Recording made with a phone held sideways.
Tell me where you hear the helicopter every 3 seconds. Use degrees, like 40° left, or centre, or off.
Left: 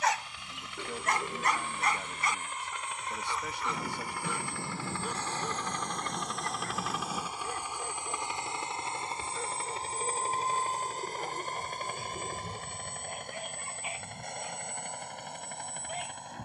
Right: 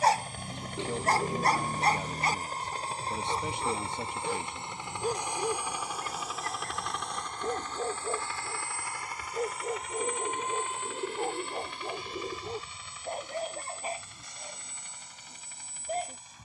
40° right, 20° right, 10° left, 40° left, 50° left, 60° left.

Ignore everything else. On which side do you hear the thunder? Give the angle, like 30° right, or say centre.
60° left.